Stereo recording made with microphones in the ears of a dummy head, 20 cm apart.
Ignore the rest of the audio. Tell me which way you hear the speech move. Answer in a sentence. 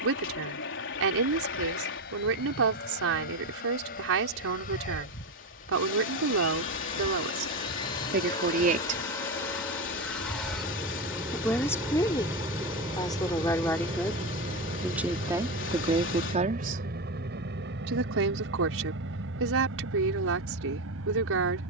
You can hear the speech move from right to left and back again.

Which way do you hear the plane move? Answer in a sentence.
In this clip you hear the plane go from the left side to the right.